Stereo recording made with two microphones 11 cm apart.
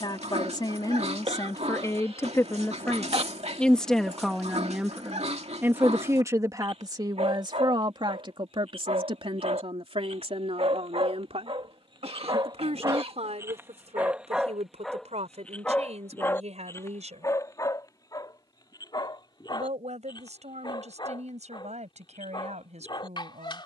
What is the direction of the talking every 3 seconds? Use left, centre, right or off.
left, centre, right, right, right, right, right, right.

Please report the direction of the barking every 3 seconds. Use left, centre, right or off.
right, right, right, right, right, left, left, left.